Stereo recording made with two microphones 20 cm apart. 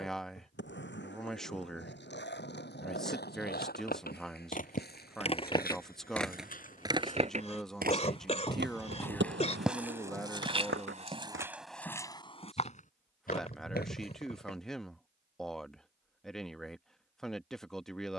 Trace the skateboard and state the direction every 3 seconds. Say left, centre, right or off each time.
left, left, right, right, off, off.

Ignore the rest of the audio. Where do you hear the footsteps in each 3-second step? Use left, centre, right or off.
off, left, left, centre, left, off.